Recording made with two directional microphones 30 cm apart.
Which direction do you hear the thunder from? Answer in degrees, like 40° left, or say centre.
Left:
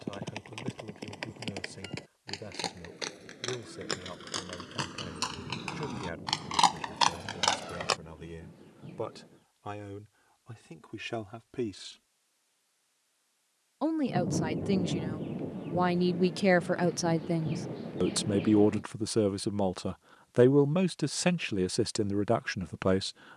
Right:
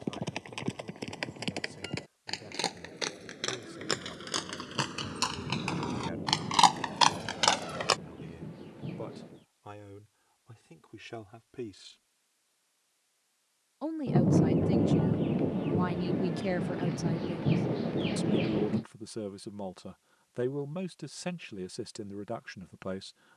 50° right.